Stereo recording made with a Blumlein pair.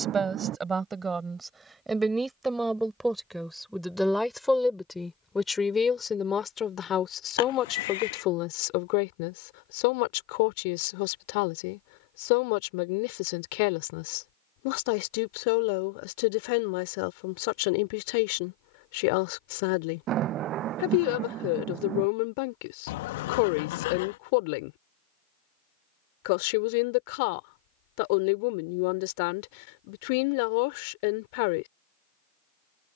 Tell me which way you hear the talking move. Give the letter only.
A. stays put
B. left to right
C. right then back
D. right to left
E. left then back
D.